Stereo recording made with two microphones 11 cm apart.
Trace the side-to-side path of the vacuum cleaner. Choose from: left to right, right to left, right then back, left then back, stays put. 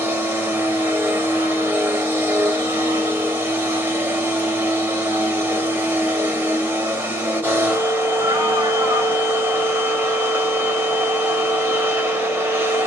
stays put.